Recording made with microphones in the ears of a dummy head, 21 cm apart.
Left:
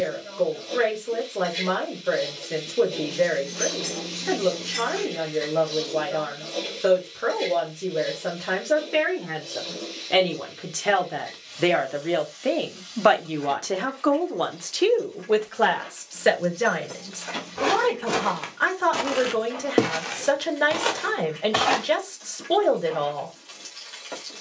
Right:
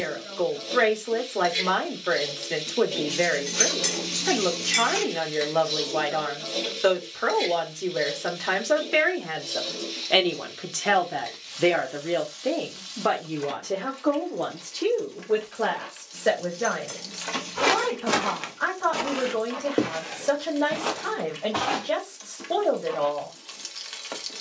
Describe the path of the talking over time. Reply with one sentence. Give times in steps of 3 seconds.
You can hear the talking on the right from 0 s, in the centre from 9 s and on the left from 12 s.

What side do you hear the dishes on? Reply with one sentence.
You can hear the dishes on the right.